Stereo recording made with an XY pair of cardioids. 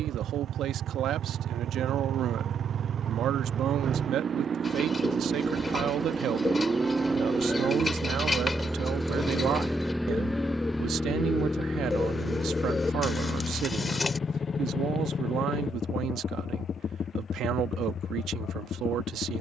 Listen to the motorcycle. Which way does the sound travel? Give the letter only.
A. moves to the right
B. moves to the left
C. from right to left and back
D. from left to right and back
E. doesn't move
B.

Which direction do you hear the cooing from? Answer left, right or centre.
left.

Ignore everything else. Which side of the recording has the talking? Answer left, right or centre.
right.